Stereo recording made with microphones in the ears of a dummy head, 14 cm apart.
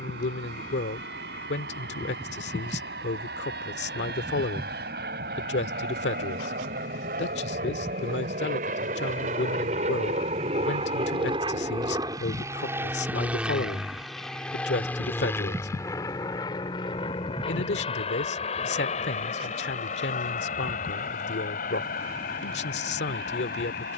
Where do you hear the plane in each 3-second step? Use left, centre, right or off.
right, right, right, right, centre, left, left, left.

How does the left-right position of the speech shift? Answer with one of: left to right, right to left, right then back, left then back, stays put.
stays put.